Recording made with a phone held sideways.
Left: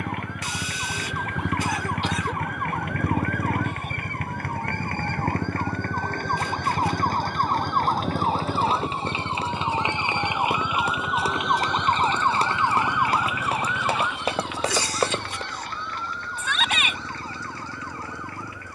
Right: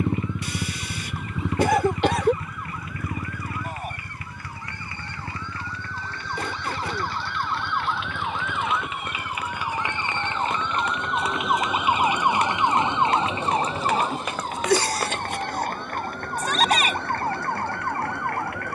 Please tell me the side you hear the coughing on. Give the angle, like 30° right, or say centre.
60° right.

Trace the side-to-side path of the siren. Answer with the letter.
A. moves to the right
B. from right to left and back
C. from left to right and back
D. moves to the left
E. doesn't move
A.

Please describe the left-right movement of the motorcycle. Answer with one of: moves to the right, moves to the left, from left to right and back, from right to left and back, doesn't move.
moves to the left.